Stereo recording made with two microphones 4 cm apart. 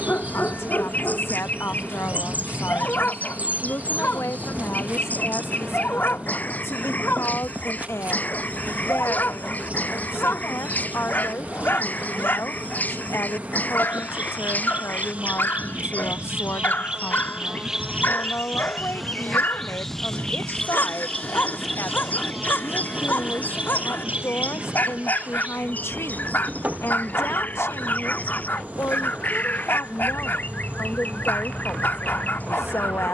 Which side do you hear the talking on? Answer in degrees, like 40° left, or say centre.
70° left.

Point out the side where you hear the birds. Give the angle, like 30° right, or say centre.
40° left.